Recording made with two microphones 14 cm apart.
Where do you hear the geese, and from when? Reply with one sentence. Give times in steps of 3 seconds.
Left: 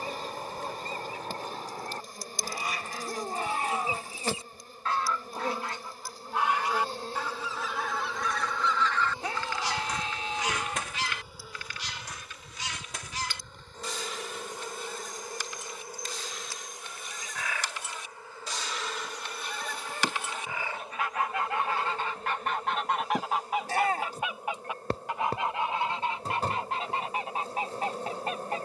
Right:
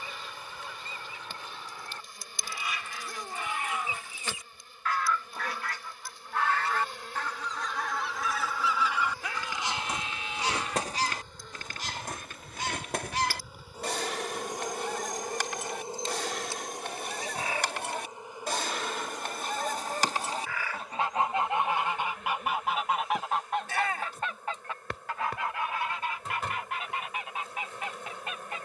You can hear the geese on the left from 0 s, in the centre from 6 s, on the right from 9 s, in the centre from 21 s and on the left from 24 s.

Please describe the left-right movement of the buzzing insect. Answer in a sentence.
In this clip you hear the buzzing insect move from left to right and back again.